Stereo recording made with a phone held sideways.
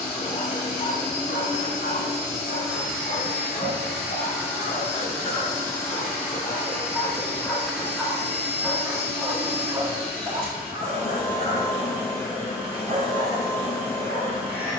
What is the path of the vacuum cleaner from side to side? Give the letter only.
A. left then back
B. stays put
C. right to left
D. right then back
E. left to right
B.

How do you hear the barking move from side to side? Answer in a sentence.
You can hear the barking move to the right.